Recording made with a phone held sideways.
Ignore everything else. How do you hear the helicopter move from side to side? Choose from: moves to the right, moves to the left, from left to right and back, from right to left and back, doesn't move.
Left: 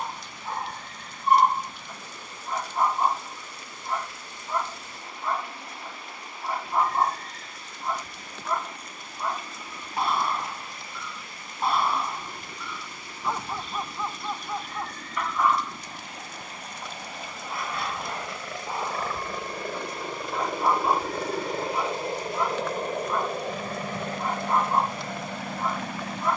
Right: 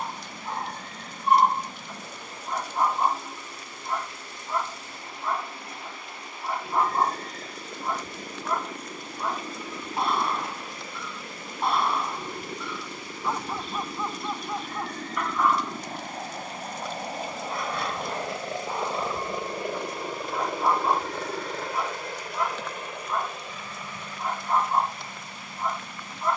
moves to the left.